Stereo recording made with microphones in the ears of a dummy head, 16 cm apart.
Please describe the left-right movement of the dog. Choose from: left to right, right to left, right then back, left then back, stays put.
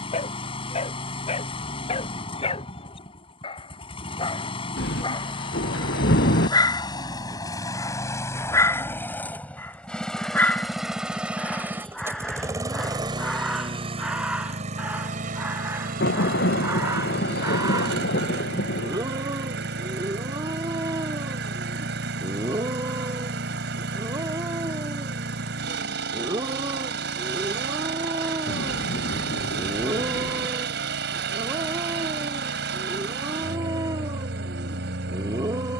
left to right.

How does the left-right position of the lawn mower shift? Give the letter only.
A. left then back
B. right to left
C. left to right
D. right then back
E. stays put
C.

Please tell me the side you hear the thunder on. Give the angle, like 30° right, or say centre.
60° left.